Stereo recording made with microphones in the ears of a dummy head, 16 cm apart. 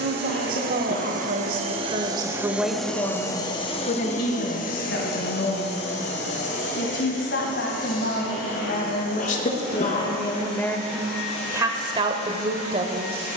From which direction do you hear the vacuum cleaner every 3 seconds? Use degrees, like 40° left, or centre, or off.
30° right, 40° left, 70° left, 70° left, 80° left.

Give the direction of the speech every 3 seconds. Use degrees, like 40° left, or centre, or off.
30° right, 50° left, 60° left, 10° left, 30° right.